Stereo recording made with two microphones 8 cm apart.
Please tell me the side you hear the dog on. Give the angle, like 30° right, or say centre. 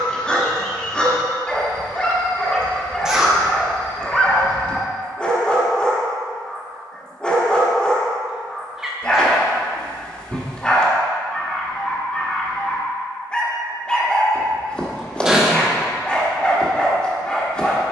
10° left.